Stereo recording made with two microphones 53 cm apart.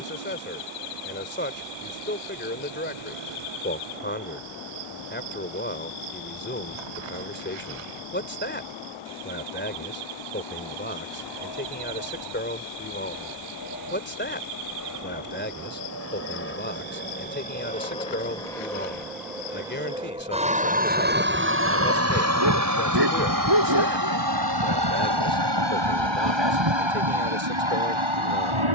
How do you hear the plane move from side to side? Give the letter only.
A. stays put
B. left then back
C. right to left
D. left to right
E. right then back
D.